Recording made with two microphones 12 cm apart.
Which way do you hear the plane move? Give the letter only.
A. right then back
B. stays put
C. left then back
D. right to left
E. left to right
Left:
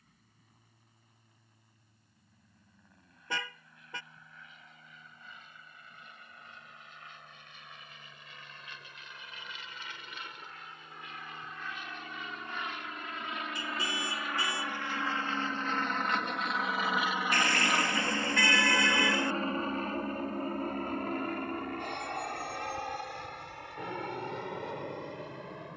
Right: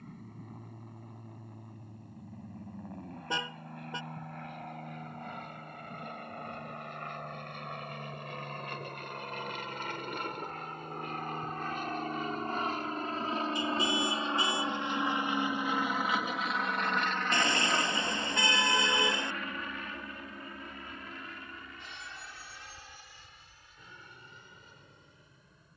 D.